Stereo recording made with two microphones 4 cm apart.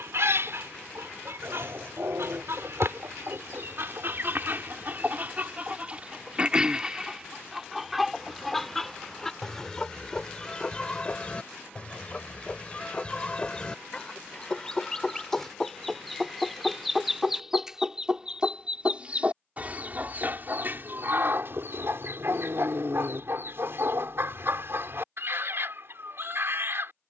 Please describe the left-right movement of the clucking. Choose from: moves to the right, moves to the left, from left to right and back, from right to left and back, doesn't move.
from right to left and back.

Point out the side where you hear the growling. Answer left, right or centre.
right.